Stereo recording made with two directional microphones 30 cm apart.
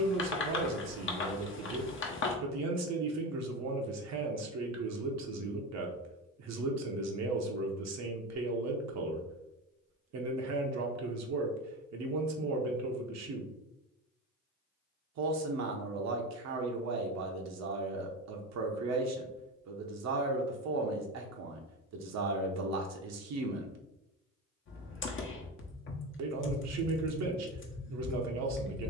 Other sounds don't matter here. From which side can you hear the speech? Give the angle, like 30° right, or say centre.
60° right.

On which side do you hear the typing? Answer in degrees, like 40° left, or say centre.
40° left.